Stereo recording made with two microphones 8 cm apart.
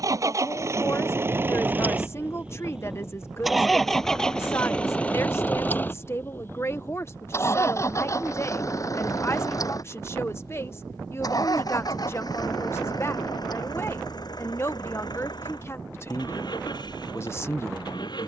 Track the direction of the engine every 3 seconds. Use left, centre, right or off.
right, centre, left, left, left, left.